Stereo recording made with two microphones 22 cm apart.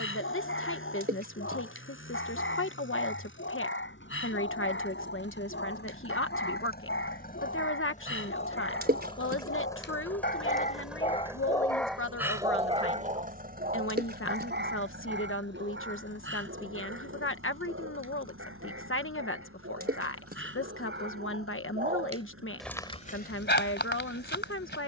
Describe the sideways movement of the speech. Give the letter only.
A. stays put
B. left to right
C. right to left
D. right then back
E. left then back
A.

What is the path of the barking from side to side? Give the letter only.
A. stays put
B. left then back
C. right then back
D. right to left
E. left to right
C.